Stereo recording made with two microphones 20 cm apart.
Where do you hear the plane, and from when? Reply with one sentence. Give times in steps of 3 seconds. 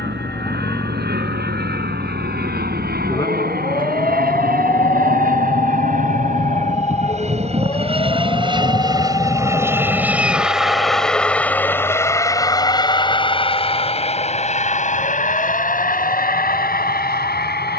You can hear the plane on the right from 0 s, in the centre from 9 s and on the left from 12 s.